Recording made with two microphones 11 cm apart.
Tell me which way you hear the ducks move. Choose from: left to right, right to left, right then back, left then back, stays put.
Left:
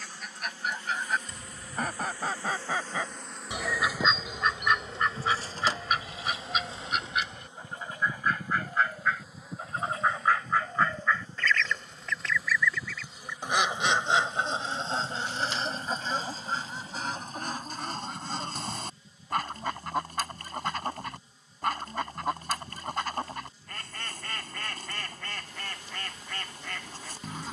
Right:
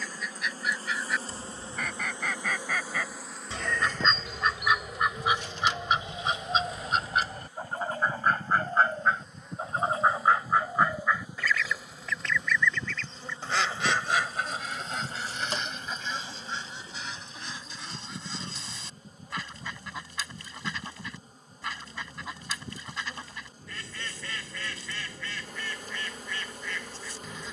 right then back.